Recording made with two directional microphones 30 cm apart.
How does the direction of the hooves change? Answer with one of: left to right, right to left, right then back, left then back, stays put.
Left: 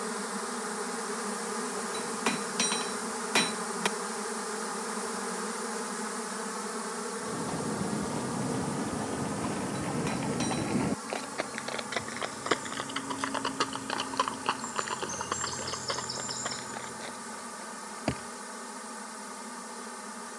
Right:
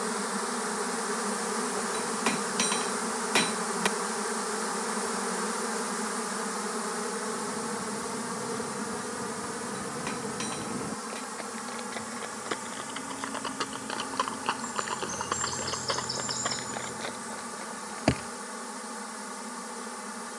left to right.